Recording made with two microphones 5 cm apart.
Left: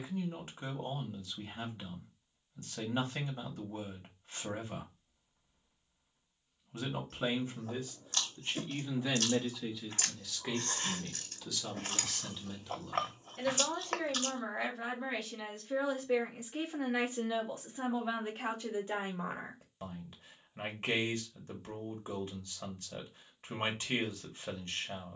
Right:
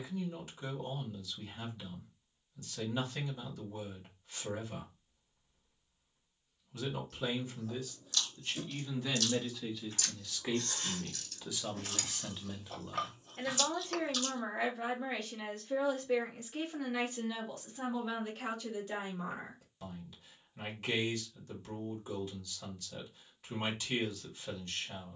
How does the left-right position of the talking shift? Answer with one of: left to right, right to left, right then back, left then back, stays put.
right then back.